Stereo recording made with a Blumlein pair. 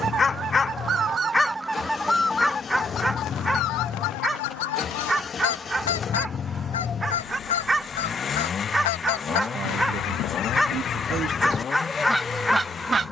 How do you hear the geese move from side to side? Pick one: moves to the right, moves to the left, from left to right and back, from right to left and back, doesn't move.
from right to left and back.